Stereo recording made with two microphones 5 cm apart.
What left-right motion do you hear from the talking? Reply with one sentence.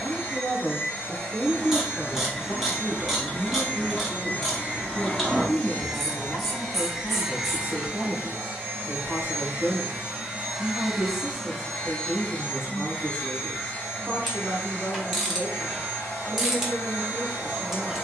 You can hear the talking move from right to left and back again.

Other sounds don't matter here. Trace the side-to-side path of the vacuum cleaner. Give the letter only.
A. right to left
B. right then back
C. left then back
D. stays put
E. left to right
B.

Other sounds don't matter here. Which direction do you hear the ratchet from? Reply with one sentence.
You can hear the ratchet in the centre.